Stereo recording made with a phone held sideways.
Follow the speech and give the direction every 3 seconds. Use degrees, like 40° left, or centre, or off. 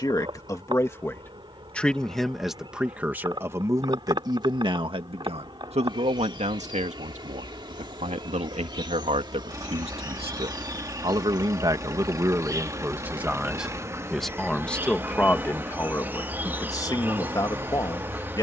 10° left, 30° right, 60° right, 40° right, 10° right, 20° left.